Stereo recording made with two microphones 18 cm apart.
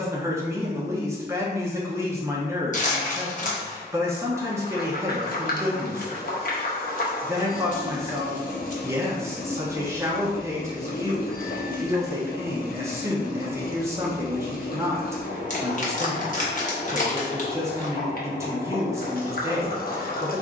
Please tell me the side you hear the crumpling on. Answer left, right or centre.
left.